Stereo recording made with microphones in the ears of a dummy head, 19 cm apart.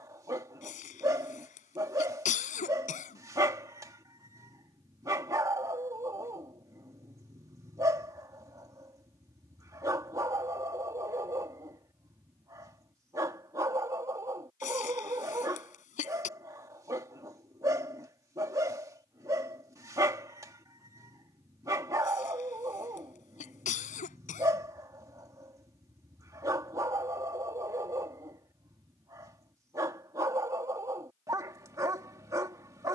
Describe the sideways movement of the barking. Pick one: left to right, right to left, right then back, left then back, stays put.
stays put.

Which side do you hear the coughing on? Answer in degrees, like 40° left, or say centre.
40° left.